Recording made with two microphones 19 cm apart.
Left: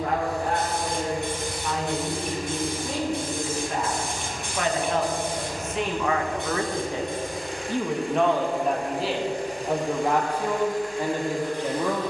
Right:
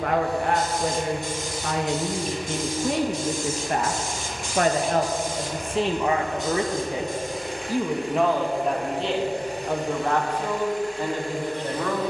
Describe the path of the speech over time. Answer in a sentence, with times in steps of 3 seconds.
You can hear the speech on the right from 0 s and in the centre from 6 s.